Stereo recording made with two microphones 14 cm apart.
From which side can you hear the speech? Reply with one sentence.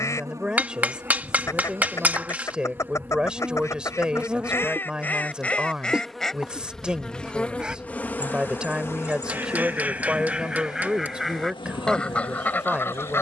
In this clip you hear the speech in the centre.